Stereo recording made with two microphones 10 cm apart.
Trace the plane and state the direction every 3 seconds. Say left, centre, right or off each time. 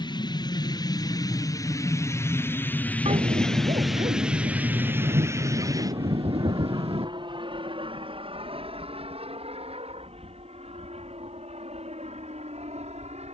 left, centre, right, right, right.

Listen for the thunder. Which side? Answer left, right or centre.
right.